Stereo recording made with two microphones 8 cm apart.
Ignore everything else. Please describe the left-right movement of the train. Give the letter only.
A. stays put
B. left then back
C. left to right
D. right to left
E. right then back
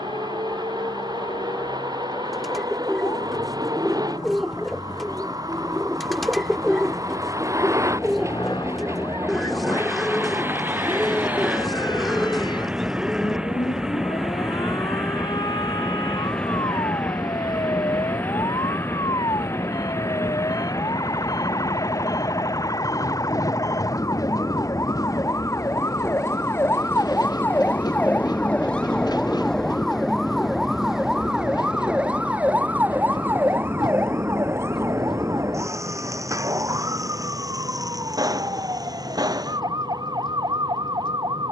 D.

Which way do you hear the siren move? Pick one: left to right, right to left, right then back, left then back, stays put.
left to right.